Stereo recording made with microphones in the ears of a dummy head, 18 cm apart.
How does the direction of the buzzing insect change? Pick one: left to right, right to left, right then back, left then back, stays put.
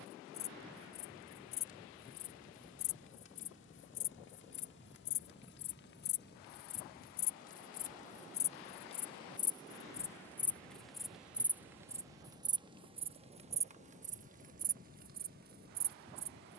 left to right.